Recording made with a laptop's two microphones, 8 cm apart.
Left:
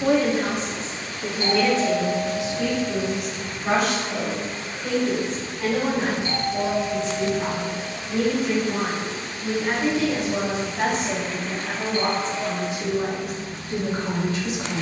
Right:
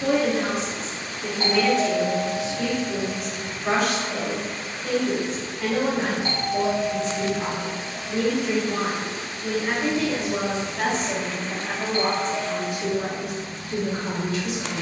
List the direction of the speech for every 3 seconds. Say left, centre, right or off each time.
left, centre, centre, centre, left.